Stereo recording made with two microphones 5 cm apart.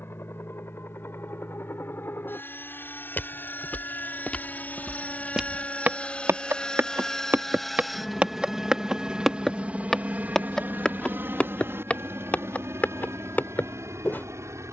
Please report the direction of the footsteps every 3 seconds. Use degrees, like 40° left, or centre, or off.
off, 10° left, 40° right, 10° left, 40° left.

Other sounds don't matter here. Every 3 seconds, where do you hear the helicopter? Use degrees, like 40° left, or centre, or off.
50° left, 40° left, 10° left, 30° right, 60° right.